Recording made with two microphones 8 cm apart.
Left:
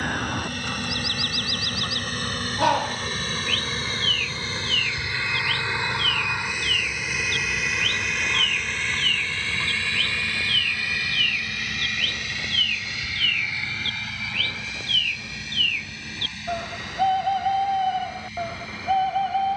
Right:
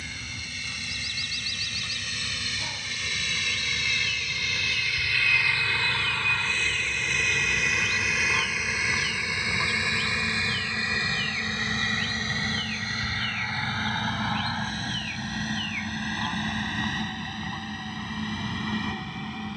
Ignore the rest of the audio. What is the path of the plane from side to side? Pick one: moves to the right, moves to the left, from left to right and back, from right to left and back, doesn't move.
moves to the right.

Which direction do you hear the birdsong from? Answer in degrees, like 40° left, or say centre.
60° left.